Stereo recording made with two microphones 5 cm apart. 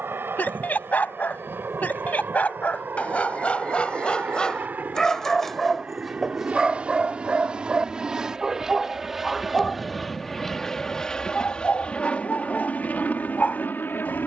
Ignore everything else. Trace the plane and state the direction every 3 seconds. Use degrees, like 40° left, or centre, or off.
40° right, 30° right, 20° right, 10° left, 30° left.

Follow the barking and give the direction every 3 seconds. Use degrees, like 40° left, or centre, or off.
30° left, 20° left, 10° right, 20° left, 30° left.